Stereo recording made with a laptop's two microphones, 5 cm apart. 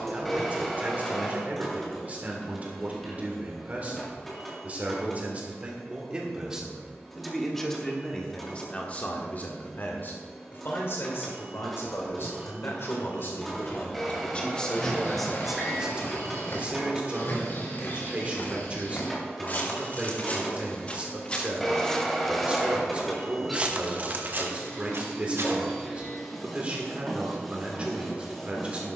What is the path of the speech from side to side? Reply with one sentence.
You can hear the speech move from right to left and back again.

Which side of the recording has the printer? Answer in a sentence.
You can hear the printer in the centre.